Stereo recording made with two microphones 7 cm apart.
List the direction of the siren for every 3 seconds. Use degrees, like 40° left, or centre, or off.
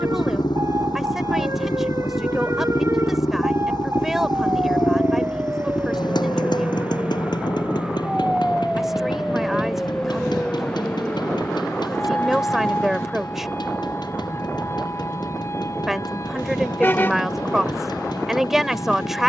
50° right, 30° right, 10° right, 10° left, 30° left, 40° left, 50° left.